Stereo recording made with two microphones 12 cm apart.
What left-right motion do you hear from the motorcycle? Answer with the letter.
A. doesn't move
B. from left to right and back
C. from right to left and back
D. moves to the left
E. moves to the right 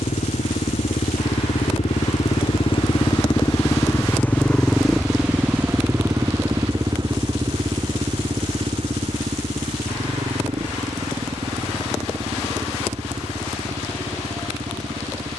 E.